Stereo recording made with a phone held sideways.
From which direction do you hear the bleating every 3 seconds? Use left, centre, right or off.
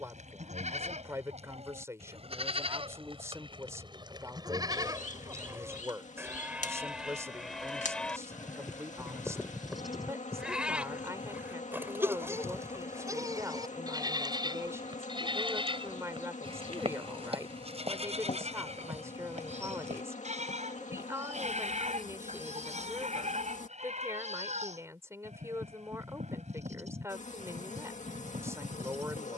right, right, centre, centre, right, right, right, right, right, right.